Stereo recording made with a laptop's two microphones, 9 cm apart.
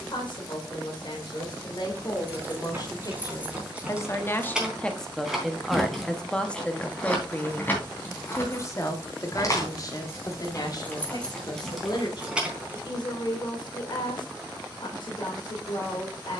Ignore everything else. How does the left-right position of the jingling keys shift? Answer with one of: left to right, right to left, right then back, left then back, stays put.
left then back.